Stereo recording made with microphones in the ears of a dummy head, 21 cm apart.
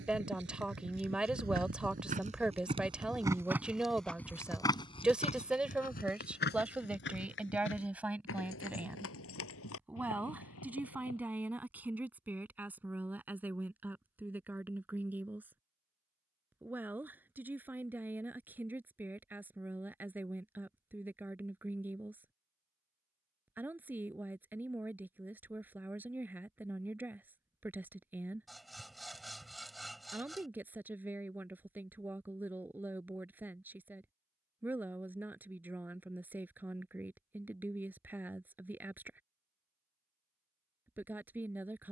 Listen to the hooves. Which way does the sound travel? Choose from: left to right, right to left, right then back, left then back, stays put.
right to left.